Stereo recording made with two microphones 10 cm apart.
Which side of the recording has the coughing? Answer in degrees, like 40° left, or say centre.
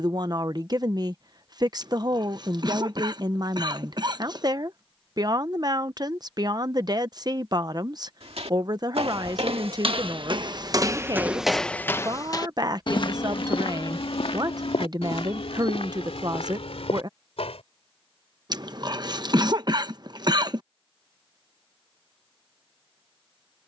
40° right.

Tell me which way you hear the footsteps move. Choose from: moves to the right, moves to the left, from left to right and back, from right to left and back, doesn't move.
moves to the left.